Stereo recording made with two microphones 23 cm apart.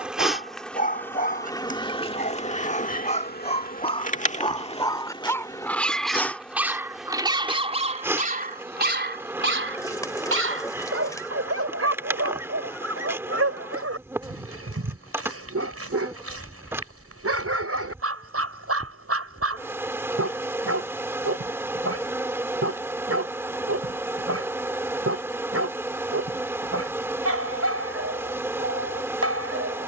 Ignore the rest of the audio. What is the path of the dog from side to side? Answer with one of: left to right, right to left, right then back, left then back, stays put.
left to right.